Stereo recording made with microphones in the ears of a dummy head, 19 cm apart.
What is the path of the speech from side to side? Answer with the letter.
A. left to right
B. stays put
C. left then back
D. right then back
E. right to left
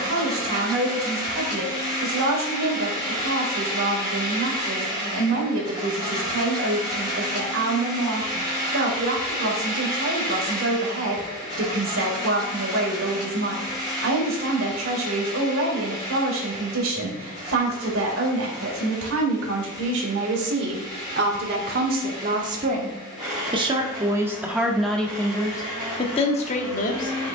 E.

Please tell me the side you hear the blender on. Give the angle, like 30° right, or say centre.
centre.